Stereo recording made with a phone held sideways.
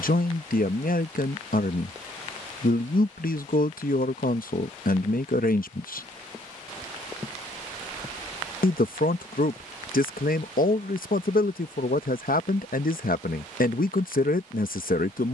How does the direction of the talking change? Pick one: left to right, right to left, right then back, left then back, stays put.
stays put.